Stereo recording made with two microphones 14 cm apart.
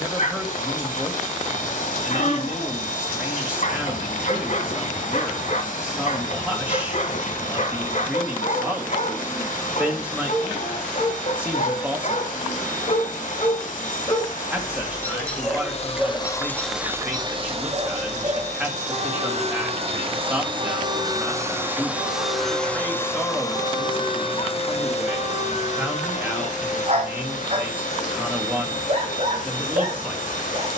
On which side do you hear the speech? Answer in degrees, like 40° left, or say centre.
10° right.